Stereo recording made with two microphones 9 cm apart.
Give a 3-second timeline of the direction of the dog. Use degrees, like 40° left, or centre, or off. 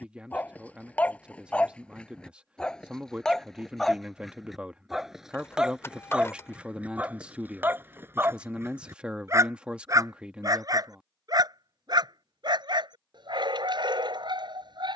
10° left, centre, 20° right, 40° right, 60° right.